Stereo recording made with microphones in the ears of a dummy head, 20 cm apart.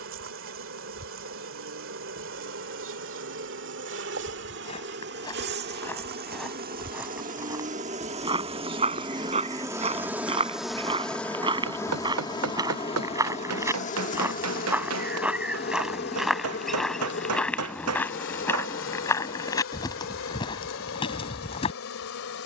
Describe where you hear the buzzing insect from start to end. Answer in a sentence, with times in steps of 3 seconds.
You can hear the buzzing insect on the right from 0 s, in the centre from 9 s and on the left from 12 s.